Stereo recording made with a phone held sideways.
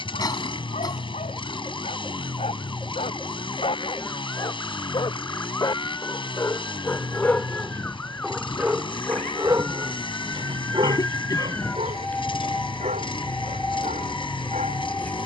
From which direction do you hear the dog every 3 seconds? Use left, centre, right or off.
left, left, centre, right, right.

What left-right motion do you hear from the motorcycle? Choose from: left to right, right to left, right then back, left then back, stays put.
stays put.